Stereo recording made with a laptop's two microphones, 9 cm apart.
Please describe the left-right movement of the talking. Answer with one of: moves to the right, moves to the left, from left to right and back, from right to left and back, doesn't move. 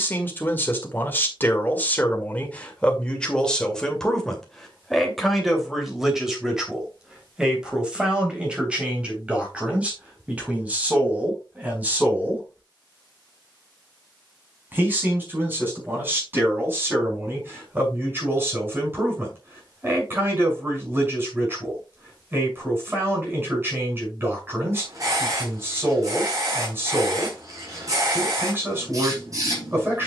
moves to the right.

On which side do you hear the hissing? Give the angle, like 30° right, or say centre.
40° right.